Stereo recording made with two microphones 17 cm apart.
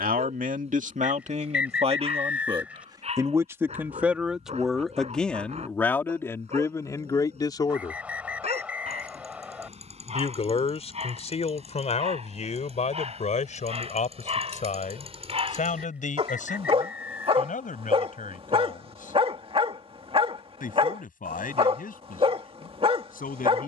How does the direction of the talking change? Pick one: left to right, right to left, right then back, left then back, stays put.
right to left.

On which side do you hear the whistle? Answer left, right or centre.
centre.